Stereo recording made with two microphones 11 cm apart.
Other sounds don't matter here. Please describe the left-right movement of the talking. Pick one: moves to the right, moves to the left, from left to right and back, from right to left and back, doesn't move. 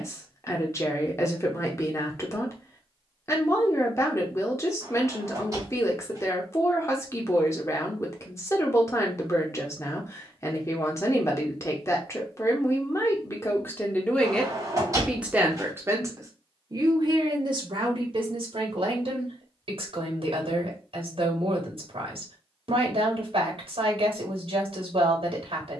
moves to the right.